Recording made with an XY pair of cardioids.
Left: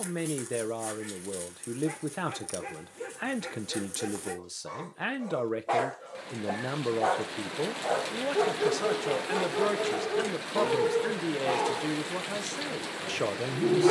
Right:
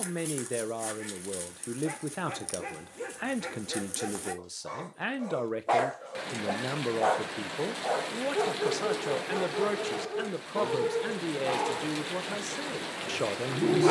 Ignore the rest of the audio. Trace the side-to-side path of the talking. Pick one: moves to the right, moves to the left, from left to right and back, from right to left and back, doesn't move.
doesn't move.